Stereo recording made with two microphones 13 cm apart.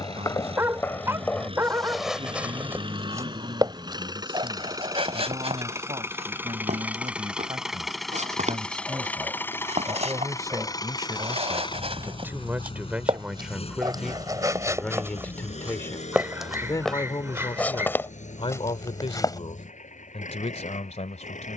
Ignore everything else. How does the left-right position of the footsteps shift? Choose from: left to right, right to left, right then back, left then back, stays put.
right then back.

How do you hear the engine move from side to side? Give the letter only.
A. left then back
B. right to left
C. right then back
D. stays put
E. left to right
B.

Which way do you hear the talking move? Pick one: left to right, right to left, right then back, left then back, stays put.
right to left.